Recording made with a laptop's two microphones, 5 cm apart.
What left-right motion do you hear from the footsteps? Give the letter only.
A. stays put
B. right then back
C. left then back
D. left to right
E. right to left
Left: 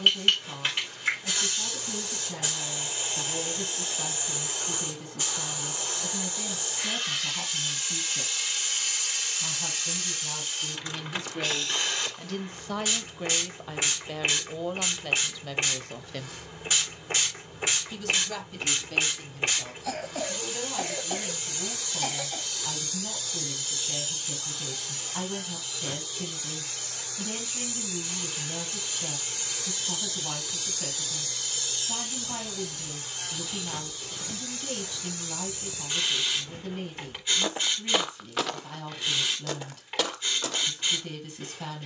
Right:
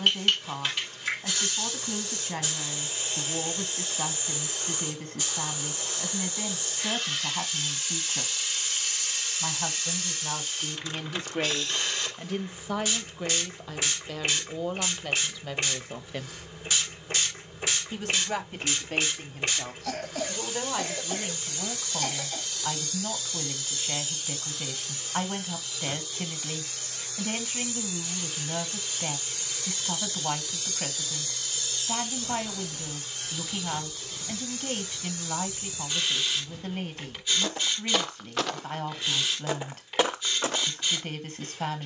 C.